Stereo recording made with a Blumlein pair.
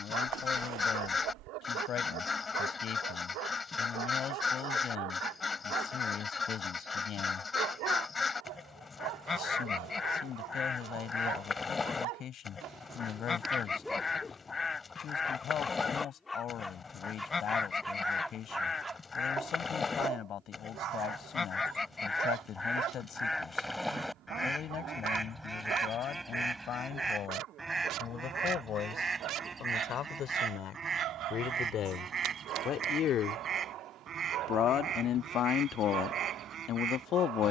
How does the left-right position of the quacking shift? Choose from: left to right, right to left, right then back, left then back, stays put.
left to right.